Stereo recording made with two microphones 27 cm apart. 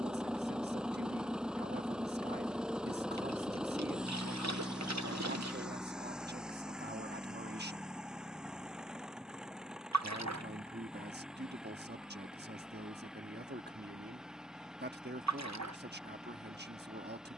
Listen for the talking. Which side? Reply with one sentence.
You can hear the talking on the right.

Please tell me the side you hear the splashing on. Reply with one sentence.
In this clip you hear the splashing on the right.